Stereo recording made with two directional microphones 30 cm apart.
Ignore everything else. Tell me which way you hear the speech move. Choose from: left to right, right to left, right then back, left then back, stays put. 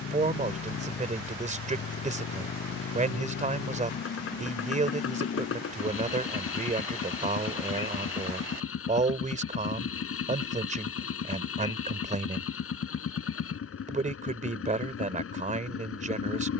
stays put.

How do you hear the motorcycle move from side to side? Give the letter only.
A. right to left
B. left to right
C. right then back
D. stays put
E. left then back
D.